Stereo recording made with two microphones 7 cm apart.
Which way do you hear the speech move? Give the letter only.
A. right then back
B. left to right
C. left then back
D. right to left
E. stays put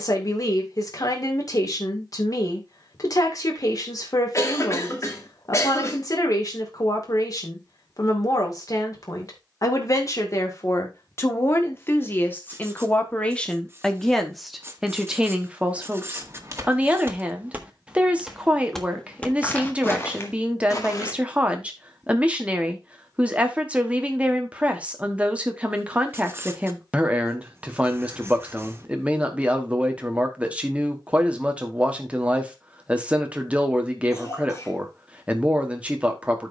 B.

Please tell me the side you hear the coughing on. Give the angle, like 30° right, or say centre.
40° left.